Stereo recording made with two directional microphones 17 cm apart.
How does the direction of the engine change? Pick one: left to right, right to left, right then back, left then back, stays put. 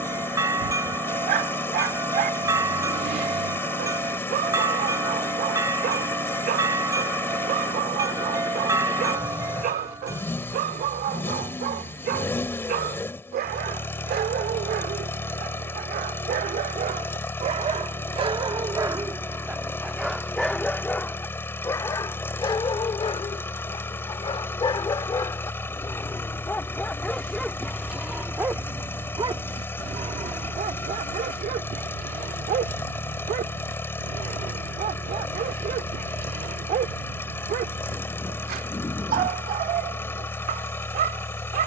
stays put.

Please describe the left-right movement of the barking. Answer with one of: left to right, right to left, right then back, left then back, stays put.
left then back.